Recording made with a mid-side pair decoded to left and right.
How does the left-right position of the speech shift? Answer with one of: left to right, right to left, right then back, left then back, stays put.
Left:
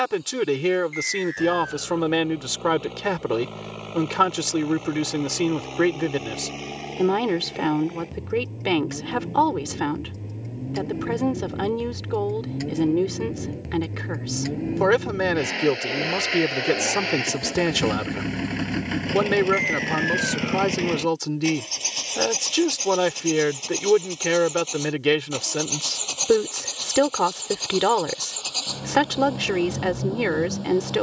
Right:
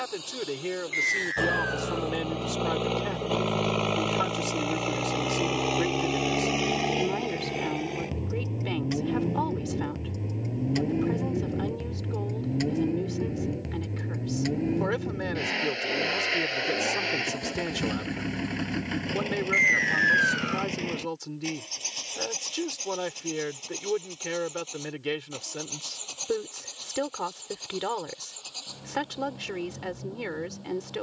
stays put.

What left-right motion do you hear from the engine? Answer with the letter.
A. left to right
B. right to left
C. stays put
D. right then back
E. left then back
B.